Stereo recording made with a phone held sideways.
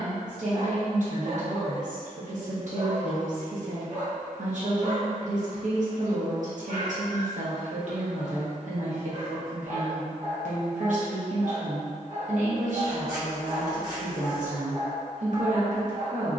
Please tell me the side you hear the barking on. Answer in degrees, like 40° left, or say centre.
60° right.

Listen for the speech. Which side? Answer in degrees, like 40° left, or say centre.
60° right.